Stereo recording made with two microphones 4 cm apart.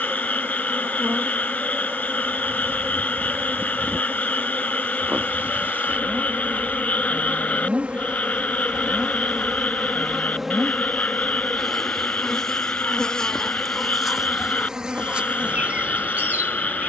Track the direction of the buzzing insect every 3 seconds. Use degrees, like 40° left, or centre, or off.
60° right, 50° right, 30° right, 10° right, centre, 40° right.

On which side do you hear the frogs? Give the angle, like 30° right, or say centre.
30° left.